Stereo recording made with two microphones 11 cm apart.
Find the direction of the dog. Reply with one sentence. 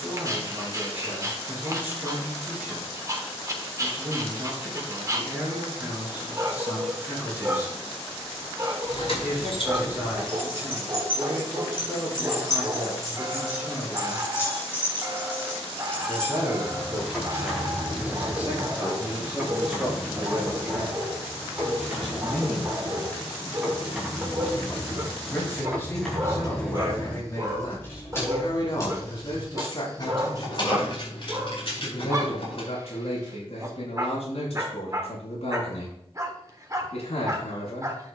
In this clip you hear the dog on the right.